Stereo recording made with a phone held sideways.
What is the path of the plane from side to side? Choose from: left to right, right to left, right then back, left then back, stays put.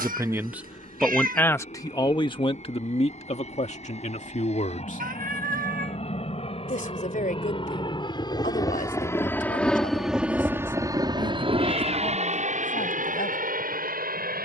left to right.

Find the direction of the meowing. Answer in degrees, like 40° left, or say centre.
80° right.